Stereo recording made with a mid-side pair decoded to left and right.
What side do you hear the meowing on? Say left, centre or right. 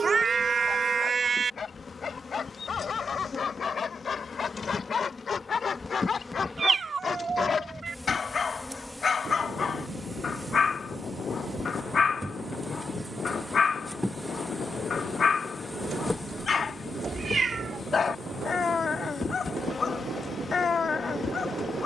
right.